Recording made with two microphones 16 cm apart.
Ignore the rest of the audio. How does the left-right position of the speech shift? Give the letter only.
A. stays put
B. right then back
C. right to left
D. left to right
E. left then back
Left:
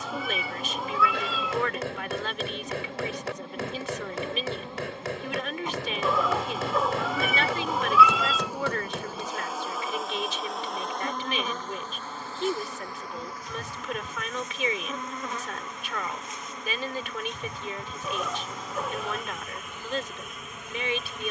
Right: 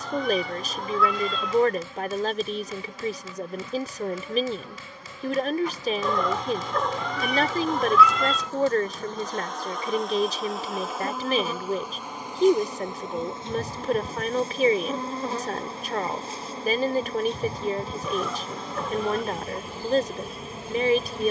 A.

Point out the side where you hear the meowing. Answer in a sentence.
You can hear the meowing in the centre.